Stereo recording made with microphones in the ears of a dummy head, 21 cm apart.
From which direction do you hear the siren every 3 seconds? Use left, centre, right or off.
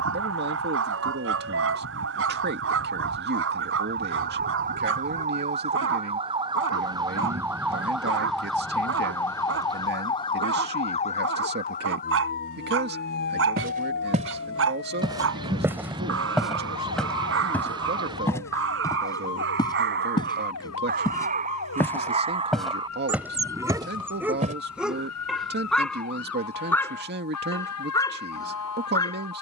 right, right, centre, left, left, left, left, left, left, left.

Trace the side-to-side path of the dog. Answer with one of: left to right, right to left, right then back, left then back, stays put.
right to left.